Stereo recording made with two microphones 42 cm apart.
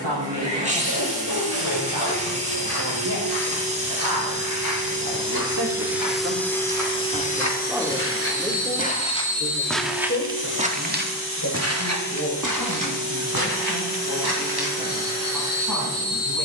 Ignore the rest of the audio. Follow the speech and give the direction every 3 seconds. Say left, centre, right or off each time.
right, right, centre, left, left, left.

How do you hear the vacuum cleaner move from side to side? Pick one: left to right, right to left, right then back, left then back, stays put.
right to left.